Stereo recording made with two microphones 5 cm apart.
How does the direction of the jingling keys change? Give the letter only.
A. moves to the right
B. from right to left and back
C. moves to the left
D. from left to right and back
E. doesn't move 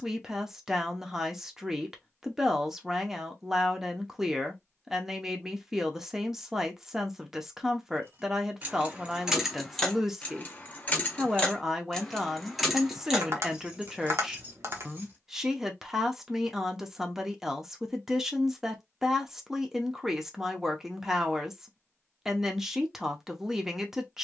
B.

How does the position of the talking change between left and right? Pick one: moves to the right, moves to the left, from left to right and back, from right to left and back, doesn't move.
doesn't move.